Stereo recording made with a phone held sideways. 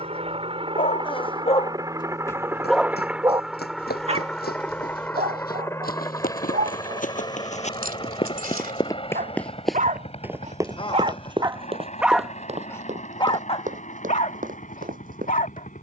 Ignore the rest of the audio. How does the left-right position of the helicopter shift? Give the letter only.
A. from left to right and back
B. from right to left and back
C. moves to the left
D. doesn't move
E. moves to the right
C.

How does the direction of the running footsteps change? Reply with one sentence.
In this clip you hear the running footsteps go from the left side to the right.